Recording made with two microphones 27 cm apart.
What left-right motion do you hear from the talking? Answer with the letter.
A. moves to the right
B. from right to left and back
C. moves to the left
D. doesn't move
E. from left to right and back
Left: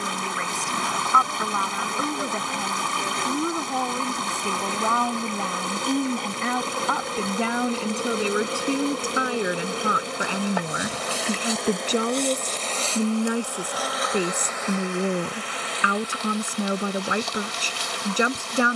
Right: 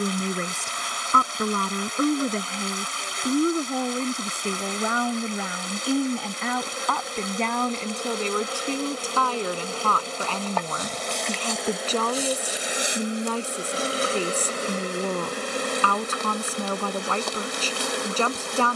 C.